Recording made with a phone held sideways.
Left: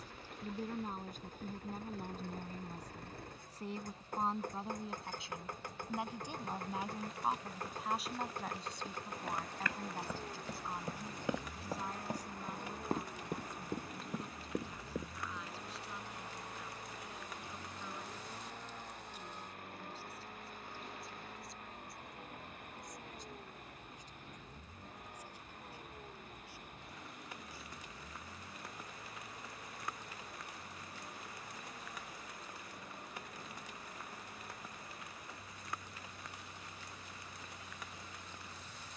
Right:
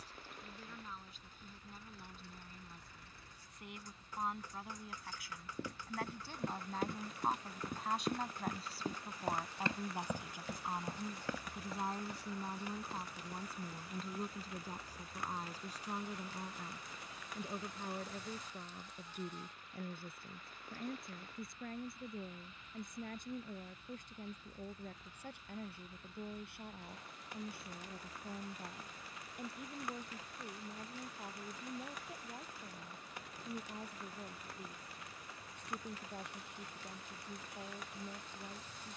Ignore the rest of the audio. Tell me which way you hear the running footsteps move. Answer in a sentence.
You can hear the running footsteps go from the right side to the left.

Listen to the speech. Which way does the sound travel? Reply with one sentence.
In this clip you hear the speech move to the right.